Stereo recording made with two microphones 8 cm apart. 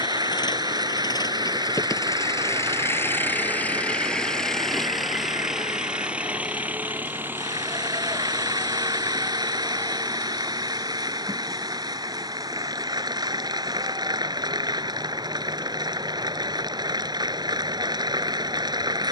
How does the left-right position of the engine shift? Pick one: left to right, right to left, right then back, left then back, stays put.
left to right.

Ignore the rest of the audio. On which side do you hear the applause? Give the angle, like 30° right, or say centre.
60° right.